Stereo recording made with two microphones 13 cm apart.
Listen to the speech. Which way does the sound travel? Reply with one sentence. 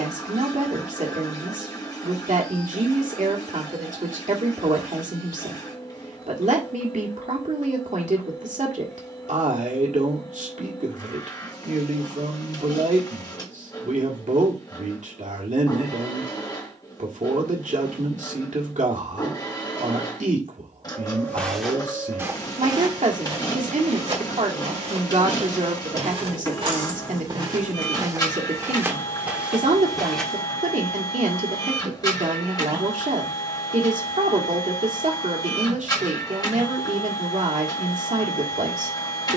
In this clip you hear the speech stay put.